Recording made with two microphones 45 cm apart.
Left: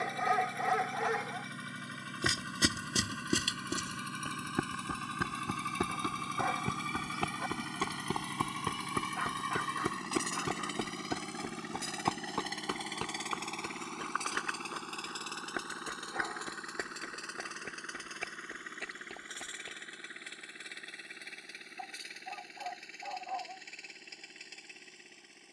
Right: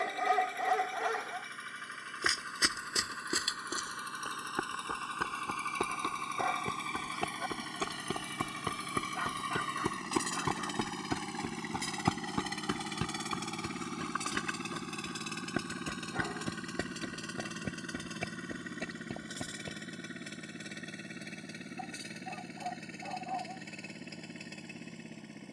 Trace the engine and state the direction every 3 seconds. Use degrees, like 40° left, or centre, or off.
50° left, 40° left, 20° left, centre, 30° right, 50° right, 60° right, 60° right, 70° right.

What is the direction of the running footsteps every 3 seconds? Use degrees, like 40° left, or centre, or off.
50° left, 40° left, 10° left, 10° right, 40° right, 50° right, 60° right, off, off.